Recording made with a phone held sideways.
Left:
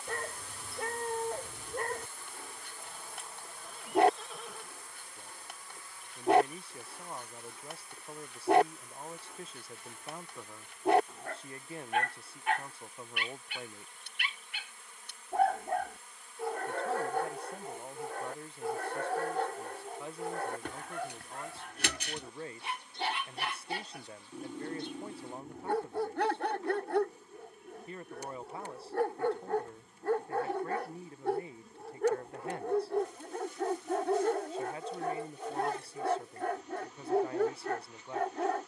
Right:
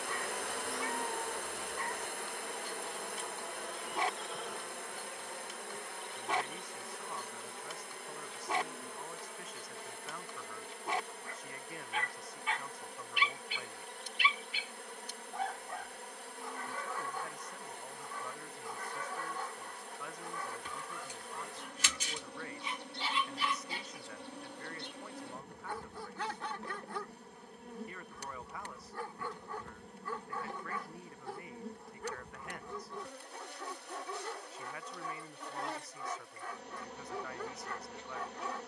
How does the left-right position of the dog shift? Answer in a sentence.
You can hear the dog stay put.